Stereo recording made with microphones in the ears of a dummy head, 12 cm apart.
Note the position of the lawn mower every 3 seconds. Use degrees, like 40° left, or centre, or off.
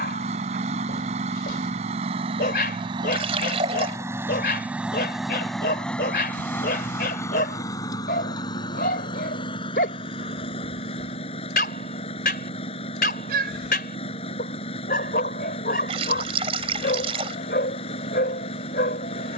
50° right, 10° right, 20° left, 40° left, 40° left, 40° left, 40° left.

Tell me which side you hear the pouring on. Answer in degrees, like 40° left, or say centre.
40° right.